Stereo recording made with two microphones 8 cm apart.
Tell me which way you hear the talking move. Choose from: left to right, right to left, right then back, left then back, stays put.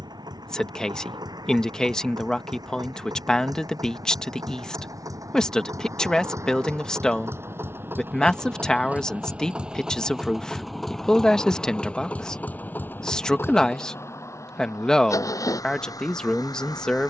stays put.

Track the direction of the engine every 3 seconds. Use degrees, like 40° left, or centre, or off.
60° right, 50° right, 30° right, centre, 30° left, 50° left.